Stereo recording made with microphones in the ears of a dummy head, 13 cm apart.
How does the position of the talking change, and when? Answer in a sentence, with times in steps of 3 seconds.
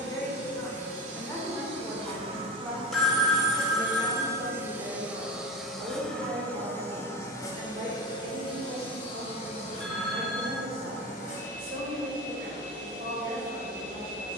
In this clip you hear the talking in the centre from 0 s and on the right from 3 s.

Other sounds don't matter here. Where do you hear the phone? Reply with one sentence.
You can hear the phone in the centre.